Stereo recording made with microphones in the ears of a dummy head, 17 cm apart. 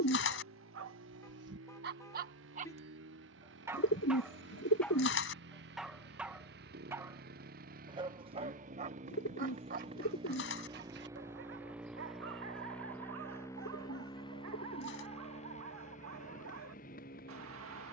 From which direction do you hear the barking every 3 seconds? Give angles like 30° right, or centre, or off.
60° right, centre, 20° right, 50° right, 80° right, 80° right.